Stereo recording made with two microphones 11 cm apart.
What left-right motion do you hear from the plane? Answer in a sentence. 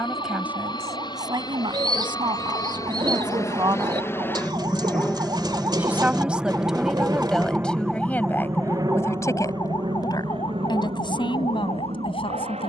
You can hear the plane go from the left side to the right.